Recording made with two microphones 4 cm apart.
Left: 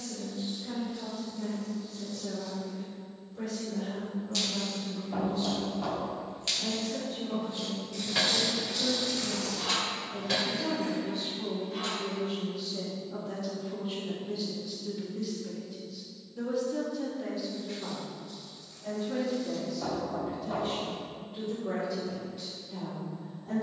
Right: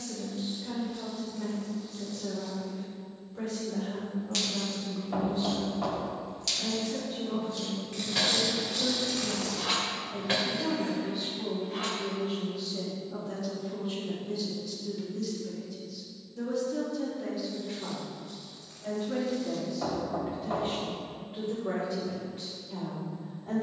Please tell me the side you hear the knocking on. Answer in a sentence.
You can hear the knocking on the right.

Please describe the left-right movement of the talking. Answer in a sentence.
You can hear the talking move from right to left and back again.